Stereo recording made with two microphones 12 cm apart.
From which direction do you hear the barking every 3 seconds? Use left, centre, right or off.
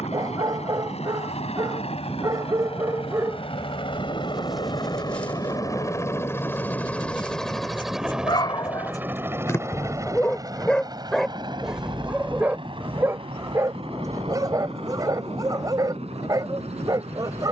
right, centre, left, centre, right, right.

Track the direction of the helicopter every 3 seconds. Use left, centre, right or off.
left, left, centre, right, right, right.